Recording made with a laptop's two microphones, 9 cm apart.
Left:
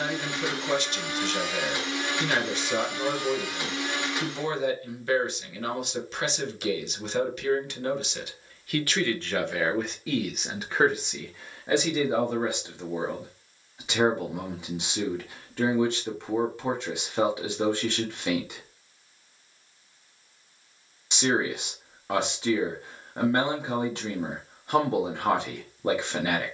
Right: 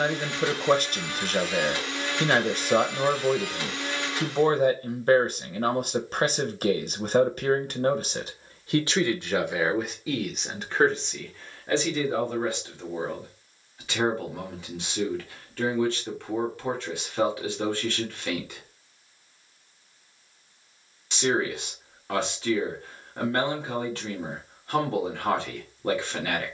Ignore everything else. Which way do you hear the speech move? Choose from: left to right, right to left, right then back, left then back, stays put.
right to left.